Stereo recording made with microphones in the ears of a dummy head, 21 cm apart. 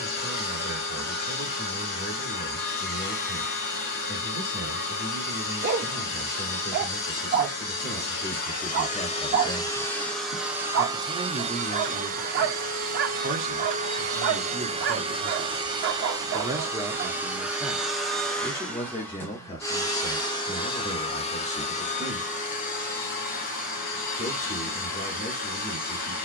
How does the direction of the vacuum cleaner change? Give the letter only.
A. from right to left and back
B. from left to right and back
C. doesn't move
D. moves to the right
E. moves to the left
B.